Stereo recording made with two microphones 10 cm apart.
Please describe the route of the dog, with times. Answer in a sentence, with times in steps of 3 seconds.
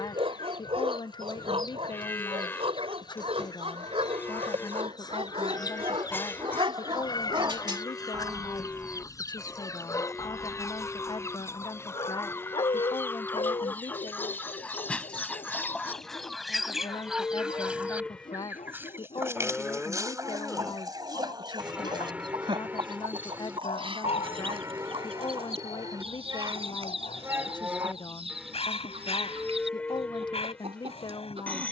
You can hear the dog on the right from 0 s and on the left from 9 s.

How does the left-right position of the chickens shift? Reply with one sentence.
In this clip you hear the chickens travel towards the right.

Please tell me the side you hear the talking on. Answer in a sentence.
You can hear the talking on the left.